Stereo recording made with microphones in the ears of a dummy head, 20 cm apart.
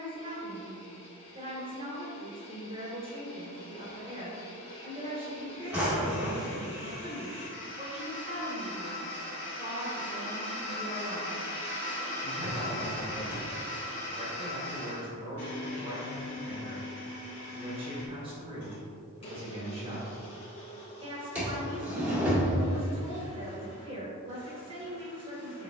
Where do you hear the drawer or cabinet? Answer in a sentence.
You can hear the drawer or cabinet in the centre.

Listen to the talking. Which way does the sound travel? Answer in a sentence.
You can hear the talking stay put.